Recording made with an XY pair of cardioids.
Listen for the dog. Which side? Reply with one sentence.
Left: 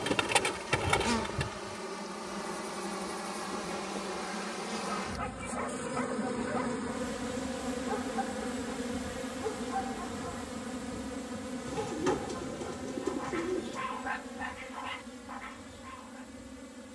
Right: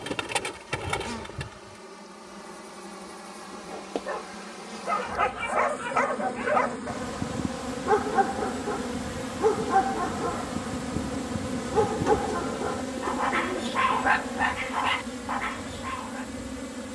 You can hear the dog on the right.